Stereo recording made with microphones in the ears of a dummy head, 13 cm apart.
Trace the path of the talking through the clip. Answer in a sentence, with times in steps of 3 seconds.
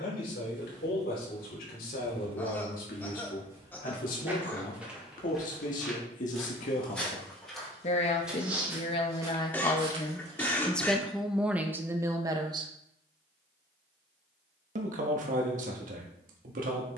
You can hear the talking on the left from 0 s, in the centre from 9 s and on the right from 12 s.